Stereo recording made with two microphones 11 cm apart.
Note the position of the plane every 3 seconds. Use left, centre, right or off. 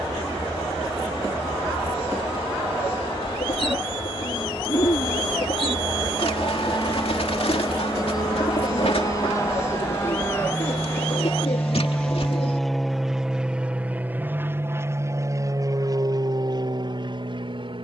left, left, left, left, centre, right.